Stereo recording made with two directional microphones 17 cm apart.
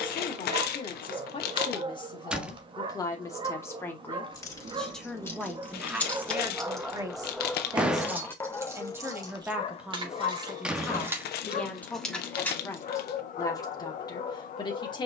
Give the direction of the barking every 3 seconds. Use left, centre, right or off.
right, right, centre, left, left.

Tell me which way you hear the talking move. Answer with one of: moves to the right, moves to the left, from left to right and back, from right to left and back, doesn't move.
from left to right and back.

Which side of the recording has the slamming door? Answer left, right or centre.
centre.